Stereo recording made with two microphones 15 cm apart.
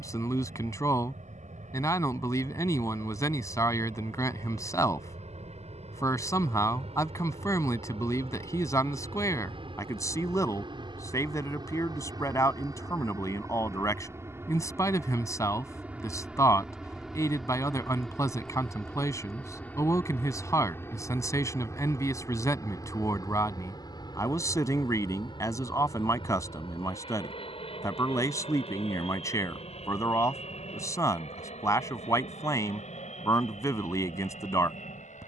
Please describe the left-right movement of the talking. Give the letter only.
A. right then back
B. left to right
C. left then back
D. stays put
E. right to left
D.